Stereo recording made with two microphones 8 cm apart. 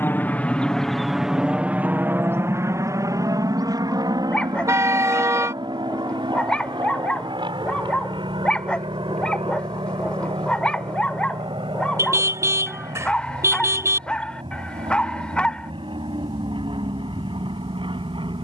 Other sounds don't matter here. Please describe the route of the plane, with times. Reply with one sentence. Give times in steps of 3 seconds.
In this clip you hear the plane in the centre from 0 s and on the right from 3 s.